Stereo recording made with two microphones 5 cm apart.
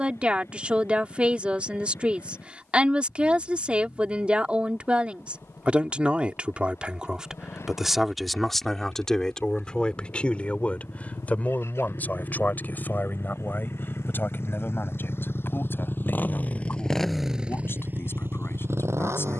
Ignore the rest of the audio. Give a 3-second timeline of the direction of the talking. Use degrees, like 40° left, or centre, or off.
30° right, 30° right, 10° right, 30° left, 40° left, 50° left, 60° left.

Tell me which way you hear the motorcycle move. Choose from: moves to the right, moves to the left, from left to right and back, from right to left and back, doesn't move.
moves to the right.